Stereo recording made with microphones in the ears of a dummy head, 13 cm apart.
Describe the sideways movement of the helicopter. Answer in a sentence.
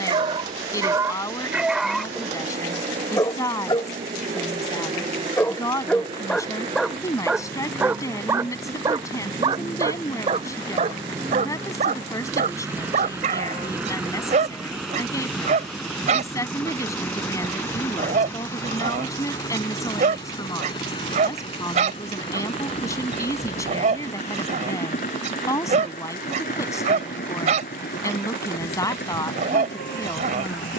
In this clip you hear the helicopter move from right to left.